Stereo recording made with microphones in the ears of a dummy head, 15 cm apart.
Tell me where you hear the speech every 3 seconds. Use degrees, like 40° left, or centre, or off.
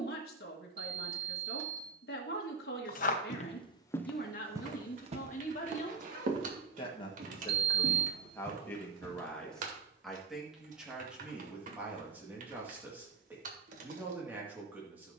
60° left, 50° left, 20° left, centre, 10° right.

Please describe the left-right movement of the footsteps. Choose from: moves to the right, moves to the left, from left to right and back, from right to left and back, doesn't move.
moves to the right.